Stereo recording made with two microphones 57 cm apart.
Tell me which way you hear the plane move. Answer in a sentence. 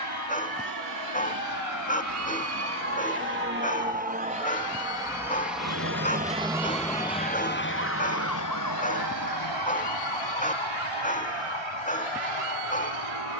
You can hear the plane move to the left.